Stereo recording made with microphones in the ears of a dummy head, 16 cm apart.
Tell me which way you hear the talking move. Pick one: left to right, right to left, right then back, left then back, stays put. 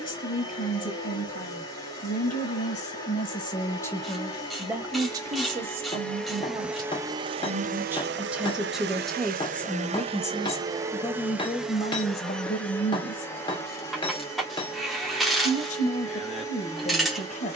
right then back.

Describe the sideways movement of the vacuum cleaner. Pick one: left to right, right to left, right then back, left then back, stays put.
right then back.